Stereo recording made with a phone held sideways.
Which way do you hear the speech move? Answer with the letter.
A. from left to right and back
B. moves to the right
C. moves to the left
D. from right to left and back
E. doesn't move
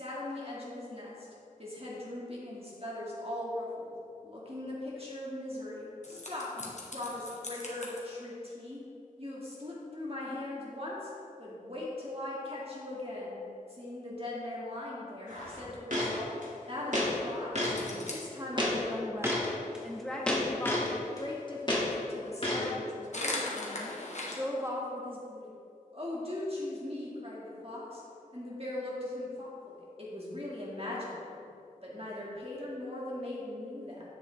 D.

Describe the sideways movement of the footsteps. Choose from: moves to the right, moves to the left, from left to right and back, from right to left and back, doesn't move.
moves to the left.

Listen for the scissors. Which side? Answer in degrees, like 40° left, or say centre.
50° left.